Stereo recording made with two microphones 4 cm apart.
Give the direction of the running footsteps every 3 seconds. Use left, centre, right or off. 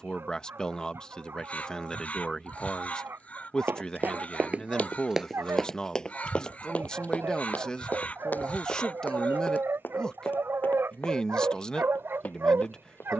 off, right, left, left, left.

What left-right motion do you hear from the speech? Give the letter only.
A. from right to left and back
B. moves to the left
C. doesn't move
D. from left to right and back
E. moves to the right
C.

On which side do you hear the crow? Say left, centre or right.
left.